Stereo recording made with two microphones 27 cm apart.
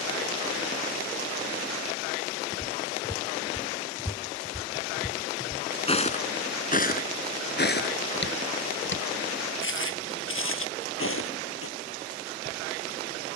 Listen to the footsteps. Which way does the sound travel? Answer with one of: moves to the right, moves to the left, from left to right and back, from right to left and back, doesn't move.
moves to the left.